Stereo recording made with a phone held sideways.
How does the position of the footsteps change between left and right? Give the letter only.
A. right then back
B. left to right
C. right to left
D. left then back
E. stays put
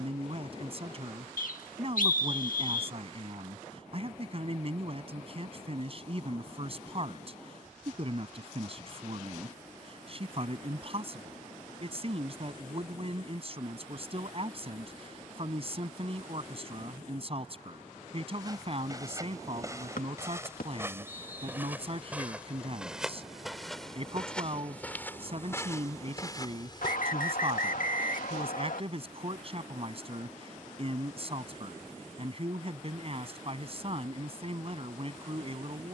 C.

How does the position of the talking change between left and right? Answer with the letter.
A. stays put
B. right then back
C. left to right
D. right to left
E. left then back
A.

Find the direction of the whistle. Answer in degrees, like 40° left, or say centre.
70° left.